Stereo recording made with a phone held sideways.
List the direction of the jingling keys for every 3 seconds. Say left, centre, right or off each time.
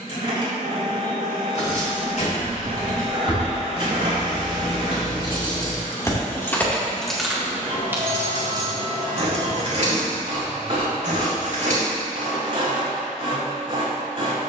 left, left, centre, right, off.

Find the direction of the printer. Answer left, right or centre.
right.